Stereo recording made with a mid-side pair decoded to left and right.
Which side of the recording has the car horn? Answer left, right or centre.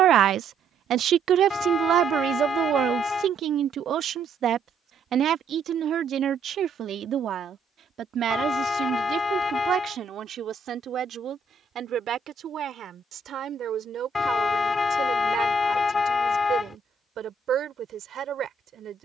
left.